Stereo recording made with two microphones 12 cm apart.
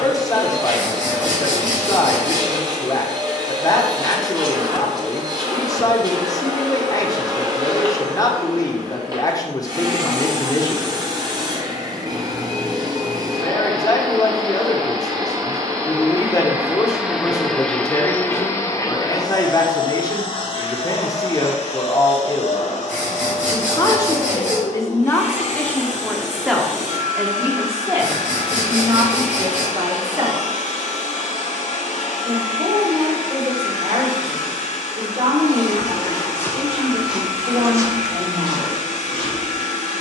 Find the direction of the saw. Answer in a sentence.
In this clip you hear the saw on the right.